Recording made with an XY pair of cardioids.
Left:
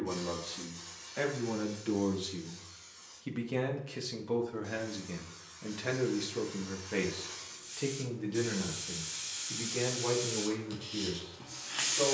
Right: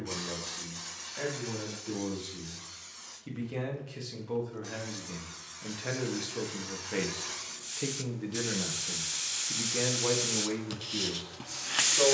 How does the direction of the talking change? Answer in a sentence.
In this clip you hear the talking move from left to right.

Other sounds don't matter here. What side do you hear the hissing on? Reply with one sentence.
You can hear the hissing on the right.